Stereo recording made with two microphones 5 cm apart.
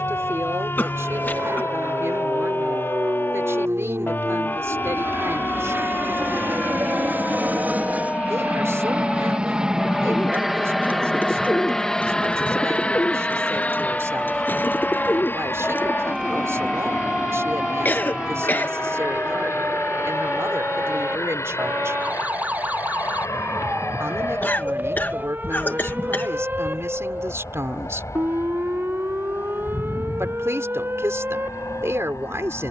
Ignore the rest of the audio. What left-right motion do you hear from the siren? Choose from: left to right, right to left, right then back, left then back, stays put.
left to right.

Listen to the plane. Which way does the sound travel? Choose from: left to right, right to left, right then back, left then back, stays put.
right to left.